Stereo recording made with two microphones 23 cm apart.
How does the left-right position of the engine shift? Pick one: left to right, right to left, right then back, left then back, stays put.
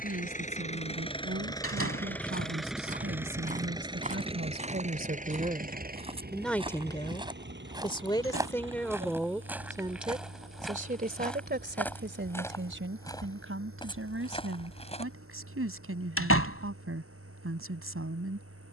left to right.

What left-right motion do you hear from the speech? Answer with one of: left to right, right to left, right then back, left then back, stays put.
left then back.